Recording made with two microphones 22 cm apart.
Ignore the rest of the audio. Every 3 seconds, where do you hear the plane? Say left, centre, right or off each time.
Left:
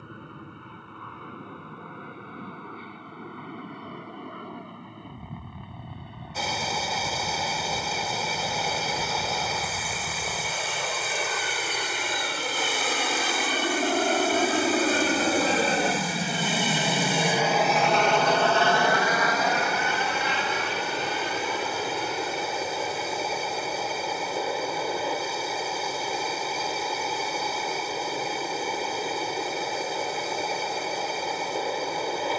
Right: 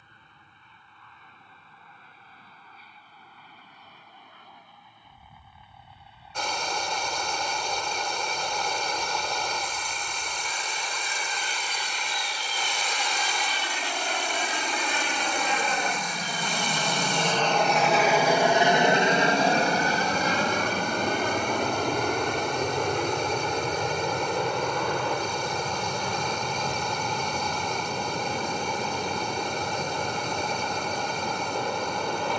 left, left, left, left, left, left, right, right, right, right, right.